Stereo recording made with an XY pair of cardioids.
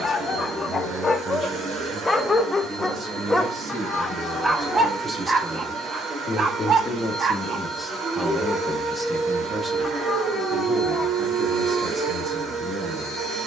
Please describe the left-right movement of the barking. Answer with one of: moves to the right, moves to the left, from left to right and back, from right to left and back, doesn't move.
moves to the right.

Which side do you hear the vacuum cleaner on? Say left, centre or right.
right.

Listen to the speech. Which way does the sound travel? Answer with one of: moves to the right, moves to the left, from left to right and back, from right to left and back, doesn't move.
from right to left and back.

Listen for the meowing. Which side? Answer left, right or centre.
left.